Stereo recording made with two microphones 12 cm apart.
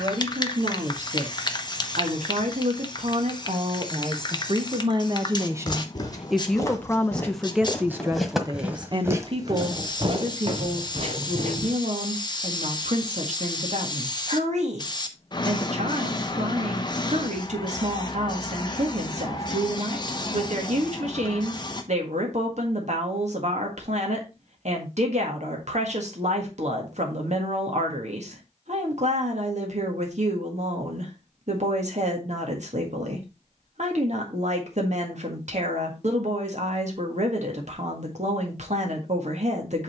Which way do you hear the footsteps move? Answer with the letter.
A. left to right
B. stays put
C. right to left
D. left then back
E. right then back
A.